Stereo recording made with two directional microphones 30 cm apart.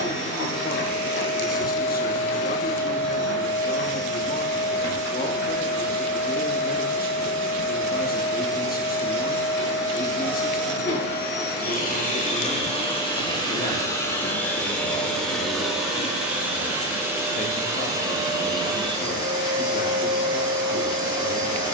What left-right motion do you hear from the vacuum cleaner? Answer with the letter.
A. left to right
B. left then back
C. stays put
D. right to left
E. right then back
A.